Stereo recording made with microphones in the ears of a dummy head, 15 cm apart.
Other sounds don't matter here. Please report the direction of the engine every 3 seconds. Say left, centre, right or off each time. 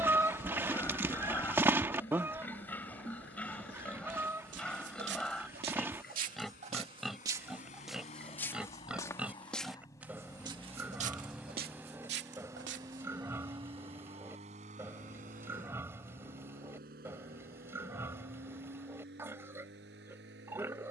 left, left, left, centre, right, right, right.